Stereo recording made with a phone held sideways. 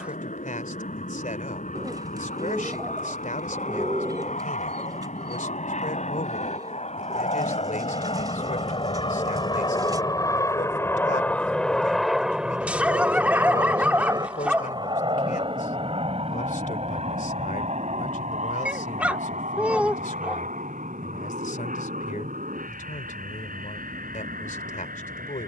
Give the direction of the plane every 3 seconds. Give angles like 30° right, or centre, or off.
70° left, 70° left, 50° left, 20° left, 20° right, 40° right, 50° right, 60° right, 70° right.